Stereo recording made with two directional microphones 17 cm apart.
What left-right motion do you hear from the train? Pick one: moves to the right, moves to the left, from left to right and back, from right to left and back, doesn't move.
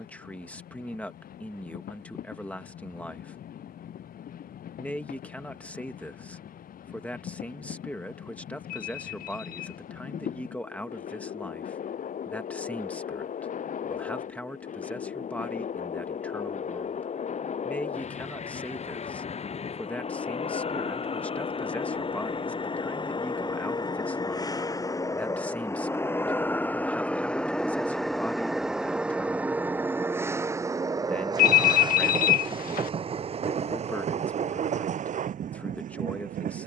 moves to the right.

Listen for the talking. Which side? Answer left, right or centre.
centre.